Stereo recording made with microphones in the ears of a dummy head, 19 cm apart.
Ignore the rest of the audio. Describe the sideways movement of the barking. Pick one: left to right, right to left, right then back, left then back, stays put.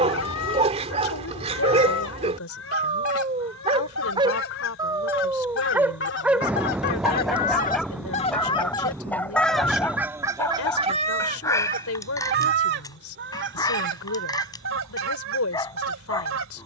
right to left.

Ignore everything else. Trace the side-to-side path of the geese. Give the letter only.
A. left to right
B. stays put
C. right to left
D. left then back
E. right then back
A.